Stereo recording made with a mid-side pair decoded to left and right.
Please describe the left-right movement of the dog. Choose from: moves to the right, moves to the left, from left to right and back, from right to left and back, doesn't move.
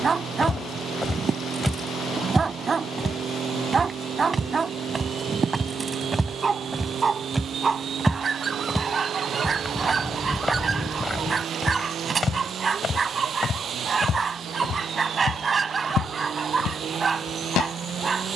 doesn't move.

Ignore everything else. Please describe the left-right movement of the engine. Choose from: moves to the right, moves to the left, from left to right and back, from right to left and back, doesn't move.
doesn't move.